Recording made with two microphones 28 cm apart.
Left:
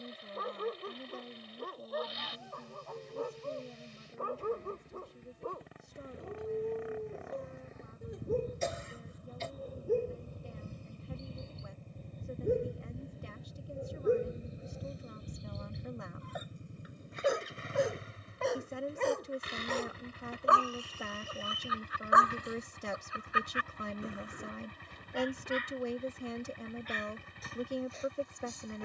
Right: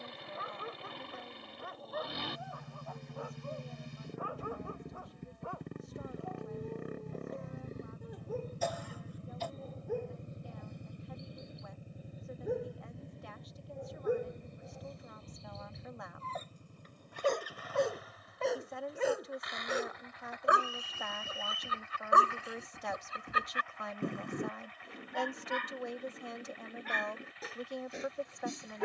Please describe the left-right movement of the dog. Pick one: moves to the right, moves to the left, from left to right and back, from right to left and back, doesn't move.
moves to the right.